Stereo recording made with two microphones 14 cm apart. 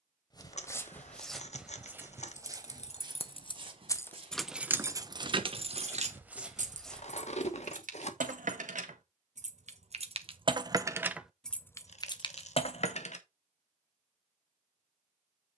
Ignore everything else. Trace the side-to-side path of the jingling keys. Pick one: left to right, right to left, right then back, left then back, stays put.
right then back.